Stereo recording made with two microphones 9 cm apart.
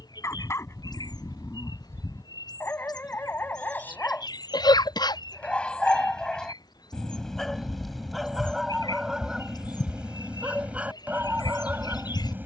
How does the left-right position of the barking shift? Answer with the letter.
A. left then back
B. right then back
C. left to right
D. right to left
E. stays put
C.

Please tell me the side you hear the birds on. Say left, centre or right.
left.